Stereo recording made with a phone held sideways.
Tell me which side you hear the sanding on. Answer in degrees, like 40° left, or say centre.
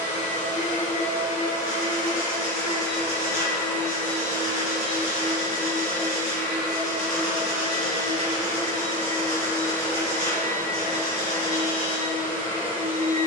50° left.